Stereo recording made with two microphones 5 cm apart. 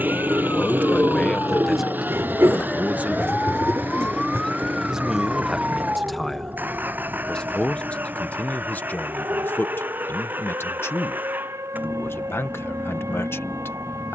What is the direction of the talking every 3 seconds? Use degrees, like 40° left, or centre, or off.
10° left, 10° right, 20° left, 50° left, 50° left.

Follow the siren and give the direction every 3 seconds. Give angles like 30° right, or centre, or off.
40° left, centre, 50° right, 70° right, 80° right.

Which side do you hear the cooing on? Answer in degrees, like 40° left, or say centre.
60° right.